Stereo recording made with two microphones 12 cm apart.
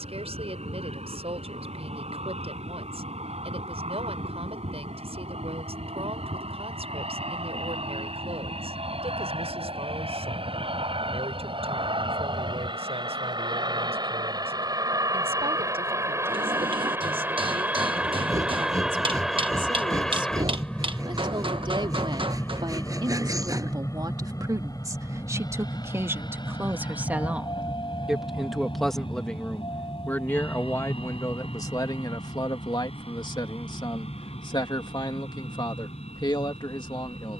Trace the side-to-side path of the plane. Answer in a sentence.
In this clip you hear the plane move from right to left.